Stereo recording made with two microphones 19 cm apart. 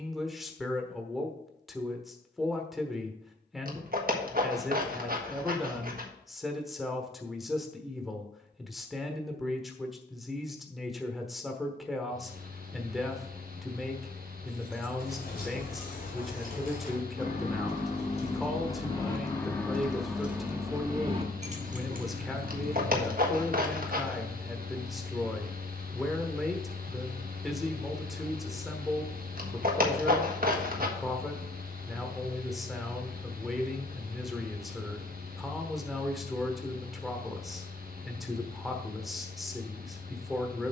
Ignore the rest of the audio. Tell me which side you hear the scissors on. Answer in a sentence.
You can hear the scissors on the right.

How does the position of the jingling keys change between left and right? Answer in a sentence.
You can hear the jingling keys travel towards the right.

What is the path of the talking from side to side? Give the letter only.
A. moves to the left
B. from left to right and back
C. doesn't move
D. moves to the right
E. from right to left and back
C.